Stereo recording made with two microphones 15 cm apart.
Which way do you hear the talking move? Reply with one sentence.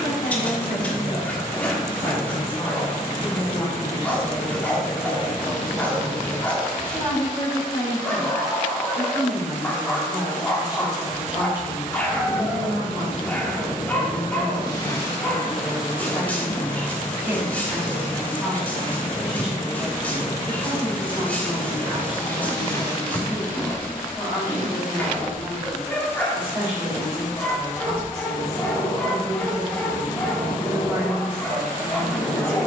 In this clip you hear the talking move from left to right.